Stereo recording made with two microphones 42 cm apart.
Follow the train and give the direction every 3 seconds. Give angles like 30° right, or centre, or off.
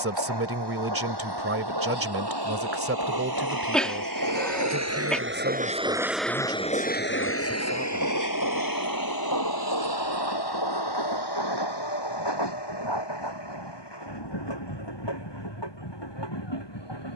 70° right, 40° right, 30° left, 60° left, 70° left, 80° left.